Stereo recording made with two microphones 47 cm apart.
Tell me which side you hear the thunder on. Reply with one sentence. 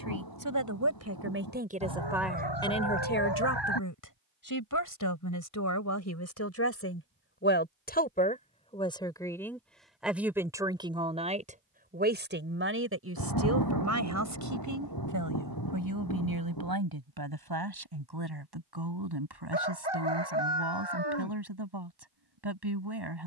In this clip you hear the thunder on the left.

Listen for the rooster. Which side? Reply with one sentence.
You can hear the rooster on the left.